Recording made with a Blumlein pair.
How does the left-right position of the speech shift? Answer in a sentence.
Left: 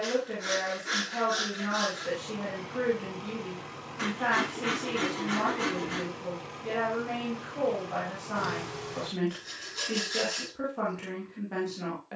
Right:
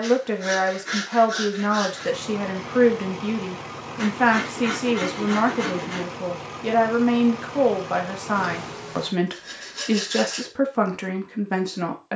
You can hear the speech stay in one place.